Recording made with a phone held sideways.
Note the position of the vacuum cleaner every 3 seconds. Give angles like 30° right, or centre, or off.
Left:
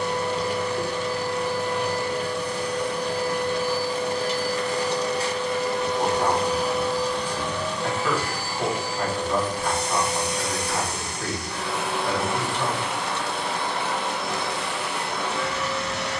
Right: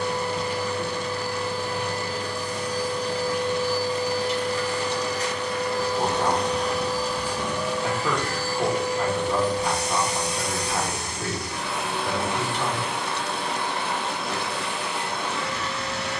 70° left, 40° left, 10° left, 60° left, 80° left, 80° left.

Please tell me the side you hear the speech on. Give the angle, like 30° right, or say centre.
10° right.